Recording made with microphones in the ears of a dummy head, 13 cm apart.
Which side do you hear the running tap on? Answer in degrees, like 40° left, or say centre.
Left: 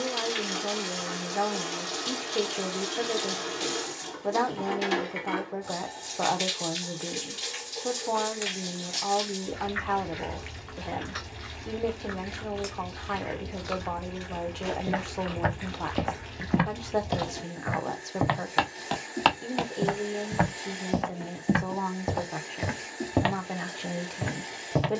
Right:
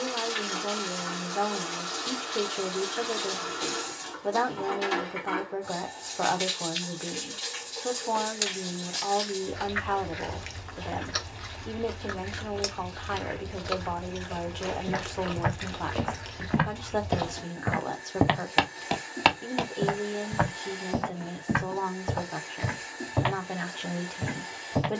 20° left.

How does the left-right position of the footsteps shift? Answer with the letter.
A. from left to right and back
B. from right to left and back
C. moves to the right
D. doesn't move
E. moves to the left
A.